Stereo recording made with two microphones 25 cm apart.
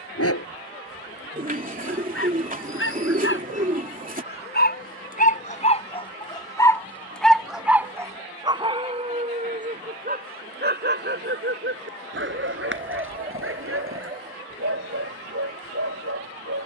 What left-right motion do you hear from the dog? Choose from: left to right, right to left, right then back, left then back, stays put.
left to right.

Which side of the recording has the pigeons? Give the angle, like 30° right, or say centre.
30° right.